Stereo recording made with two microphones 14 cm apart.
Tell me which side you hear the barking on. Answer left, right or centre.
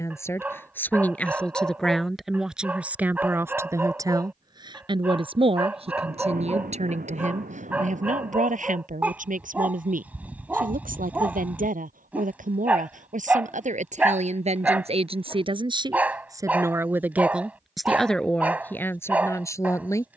centre.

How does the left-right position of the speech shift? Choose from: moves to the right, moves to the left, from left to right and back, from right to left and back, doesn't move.
from left to right and back.